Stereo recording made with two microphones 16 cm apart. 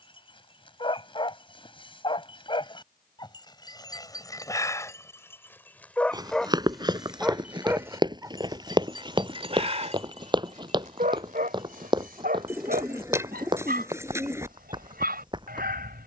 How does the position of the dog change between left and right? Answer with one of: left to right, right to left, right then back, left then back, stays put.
left to right.